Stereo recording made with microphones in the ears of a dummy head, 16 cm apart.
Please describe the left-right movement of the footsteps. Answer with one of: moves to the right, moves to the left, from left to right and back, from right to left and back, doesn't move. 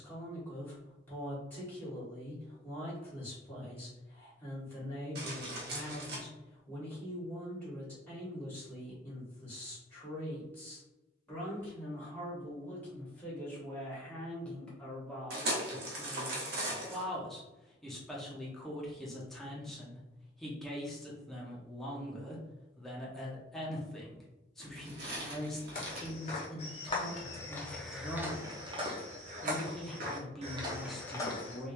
from left to right and back.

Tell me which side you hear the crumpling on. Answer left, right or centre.
right.